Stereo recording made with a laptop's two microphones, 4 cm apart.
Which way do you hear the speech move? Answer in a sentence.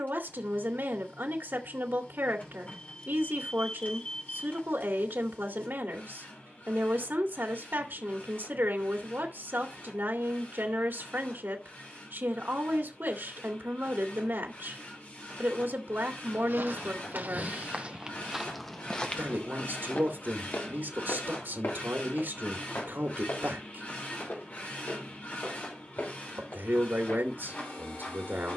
You can hear the speech stay in one place.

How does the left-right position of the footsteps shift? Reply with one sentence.
You can hear the footsteps travel towards the left.